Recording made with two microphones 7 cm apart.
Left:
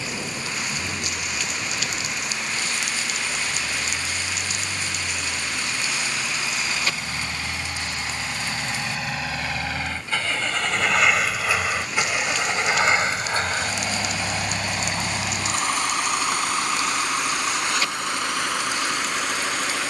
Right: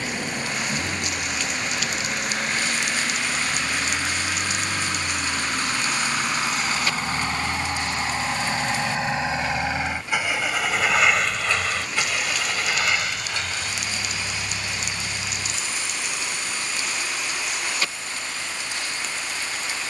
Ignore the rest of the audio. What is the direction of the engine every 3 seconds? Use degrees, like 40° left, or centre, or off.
60° right, 50° right, 40° right, 10° right, 40° left, 70° left, 80° left.